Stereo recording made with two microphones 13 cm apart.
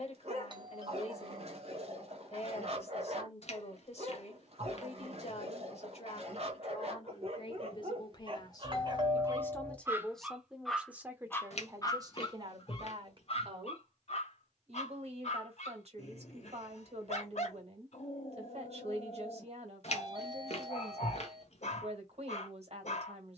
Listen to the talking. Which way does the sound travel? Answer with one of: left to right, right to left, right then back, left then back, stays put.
left to right.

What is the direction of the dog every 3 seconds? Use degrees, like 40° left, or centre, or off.
50° right, 50° right, 50° right, centre, 50° left, 60° left, 60° left, 60° left.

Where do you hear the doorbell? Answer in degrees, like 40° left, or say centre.
40° right.